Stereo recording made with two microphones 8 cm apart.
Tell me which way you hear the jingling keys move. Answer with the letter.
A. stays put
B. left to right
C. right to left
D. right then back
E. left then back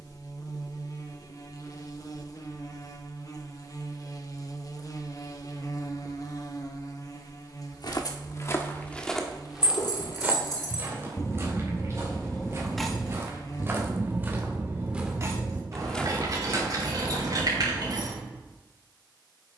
B.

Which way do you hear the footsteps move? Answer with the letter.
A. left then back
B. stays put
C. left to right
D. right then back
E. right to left
D.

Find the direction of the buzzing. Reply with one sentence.
In this clip you hear the buzzing on the left.